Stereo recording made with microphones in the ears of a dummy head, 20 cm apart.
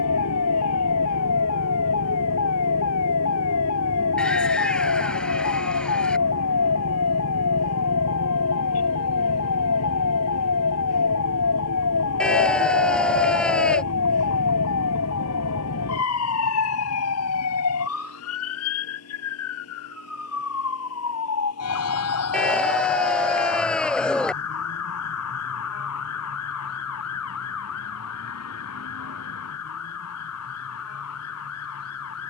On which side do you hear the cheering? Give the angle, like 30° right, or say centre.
centre.